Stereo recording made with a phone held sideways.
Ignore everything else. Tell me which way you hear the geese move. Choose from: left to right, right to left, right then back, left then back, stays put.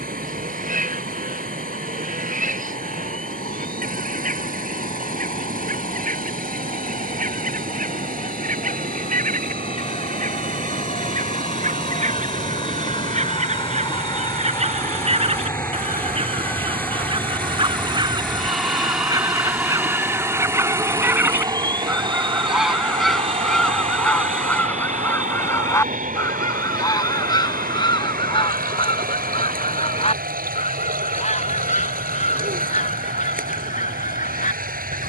right to left.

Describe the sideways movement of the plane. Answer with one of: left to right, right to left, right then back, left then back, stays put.
left to right.